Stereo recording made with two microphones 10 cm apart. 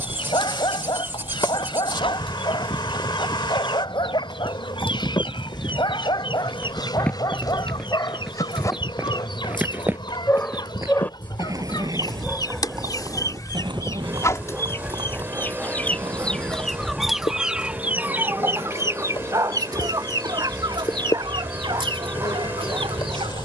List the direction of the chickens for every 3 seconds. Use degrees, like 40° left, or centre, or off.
70° left, 60° left, 60° left, 50° left, 40° left, 10° left, 40° right, 60° right.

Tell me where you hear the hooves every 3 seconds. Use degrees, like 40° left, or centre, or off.
60° left, 40° left, 10° left, 30° right, 50° right, 60° right, 70° right, off.